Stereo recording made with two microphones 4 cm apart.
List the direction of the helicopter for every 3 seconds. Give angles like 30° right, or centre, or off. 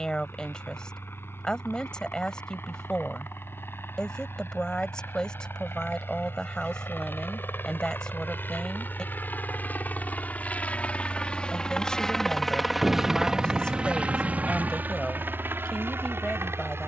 70° left, 70° left, 60° left, 40° left, 20° right, 50° right.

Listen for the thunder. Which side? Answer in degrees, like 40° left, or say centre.
centre.